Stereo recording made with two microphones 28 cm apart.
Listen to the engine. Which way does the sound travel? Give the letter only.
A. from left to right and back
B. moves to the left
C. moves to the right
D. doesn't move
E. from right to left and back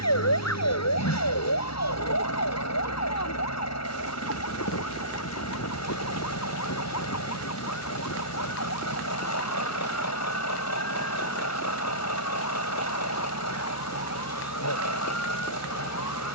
D.